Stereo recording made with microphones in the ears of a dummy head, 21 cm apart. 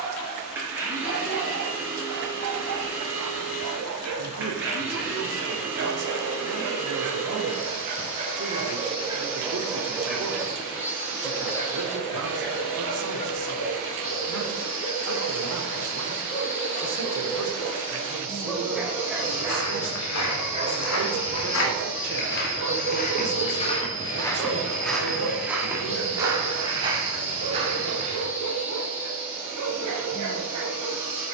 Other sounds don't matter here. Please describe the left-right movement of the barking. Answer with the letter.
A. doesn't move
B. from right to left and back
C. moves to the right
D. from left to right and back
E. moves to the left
B.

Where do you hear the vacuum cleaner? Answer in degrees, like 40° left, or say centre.
10° right.